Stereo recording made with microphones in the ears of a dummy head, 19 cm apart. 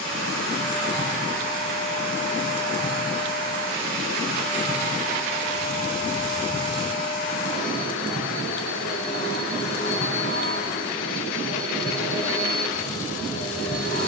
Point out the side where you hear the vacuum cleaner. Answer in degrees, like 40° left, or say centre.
70° left.